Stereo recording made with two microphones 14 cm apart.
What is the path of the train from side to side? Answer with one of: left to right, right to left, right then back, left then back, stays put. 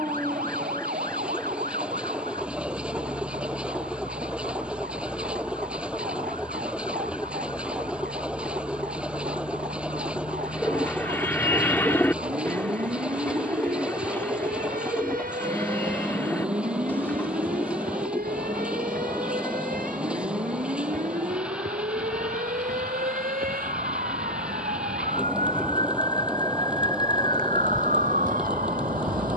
stays put.